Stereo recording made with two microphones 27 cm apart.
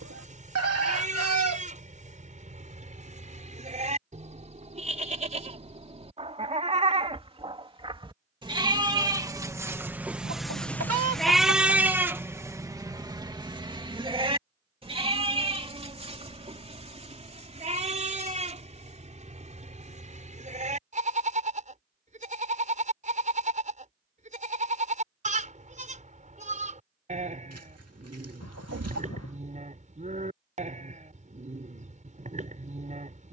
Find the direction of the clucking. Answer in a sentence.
In this clip you hear the clucking on the right.